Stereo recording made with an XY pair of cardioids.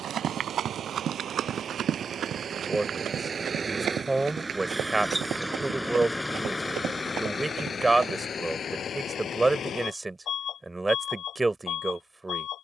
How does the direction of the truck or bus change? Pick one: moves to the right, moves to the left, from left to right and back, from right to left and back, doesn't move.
moves to the left.